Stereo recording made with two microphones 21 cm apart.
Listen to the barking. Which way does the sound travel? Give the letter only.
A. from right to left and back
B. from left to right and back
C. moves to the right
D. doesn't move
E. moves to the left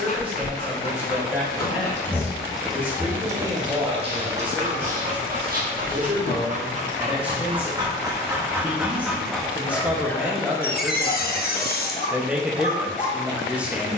B.